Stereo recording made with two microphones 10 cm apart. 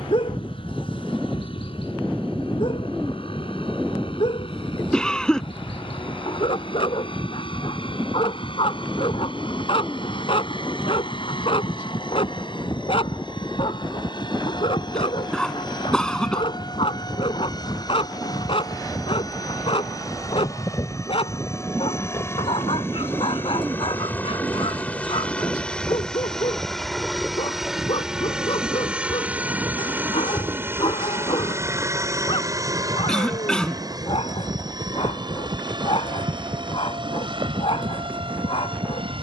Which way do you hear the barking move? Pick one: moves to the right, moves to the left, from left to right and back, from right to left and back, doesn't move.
doesn't move.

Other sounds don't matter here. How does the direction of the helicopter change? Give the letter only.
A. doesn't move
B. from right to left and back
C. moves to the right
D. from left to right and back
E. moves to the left
C.